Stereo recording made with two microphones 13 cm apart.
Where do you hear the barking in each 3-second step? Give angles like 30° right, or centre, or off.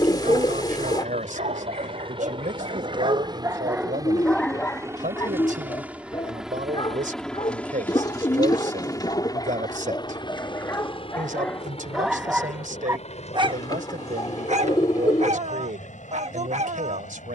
70° right, centre, 40° left, 20° left, 30° right, 60° right.